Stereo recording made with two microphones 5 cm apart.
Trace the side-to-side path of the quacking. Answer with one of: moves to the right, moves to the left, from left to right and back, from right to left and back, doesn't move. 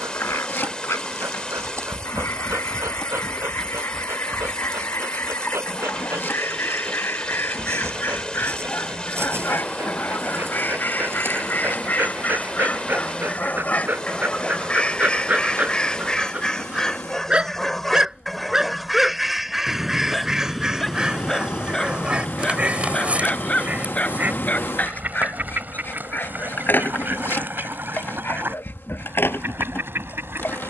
moves to the right.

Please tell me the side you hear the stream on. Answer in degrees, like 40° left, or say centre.
20° left.